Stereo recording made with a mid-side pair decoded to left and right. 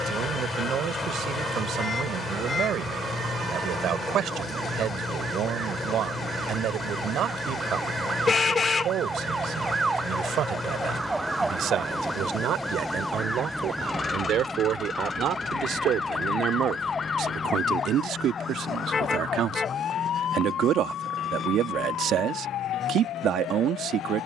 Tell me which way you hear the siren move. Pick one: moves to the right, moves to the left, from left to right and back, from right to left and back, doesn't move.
moves to the left.